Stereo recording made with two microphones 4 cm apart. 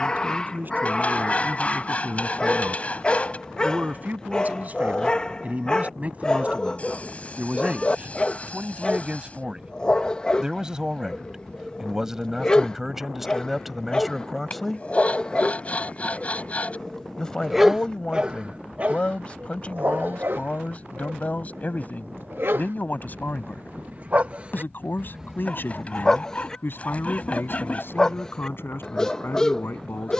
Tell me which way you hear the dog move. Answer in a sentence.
You can hear the dog move from left to right and back again.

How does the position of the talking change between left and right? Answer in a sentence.
You can hear the talking move to the left.